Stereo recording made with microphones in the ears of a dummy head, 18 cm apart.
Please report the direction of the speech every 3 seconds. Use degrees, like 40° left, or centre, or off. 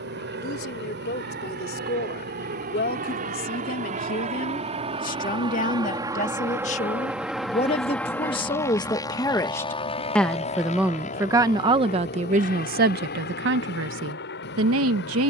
50° left, 40° left, 30° left, centre, 50° right.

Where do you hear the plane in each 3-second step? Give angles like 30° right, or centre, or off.
60° right, 30° right, centre, 30° left, 50° left.